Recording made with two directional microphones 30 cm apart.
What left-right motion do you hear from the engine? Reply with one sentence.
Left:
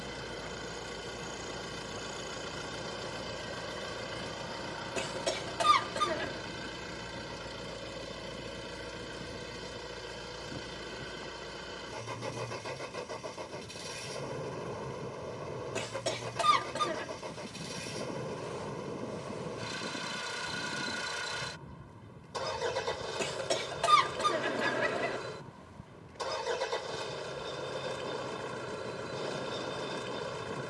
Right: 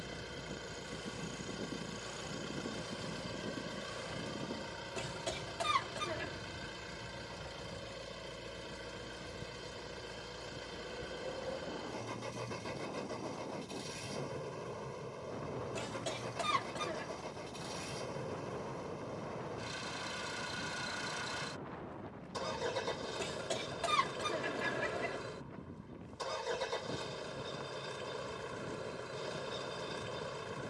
In this clip you hear the engine stay in one place.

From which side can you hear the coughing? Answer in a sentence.
You can hear the coughing on the left.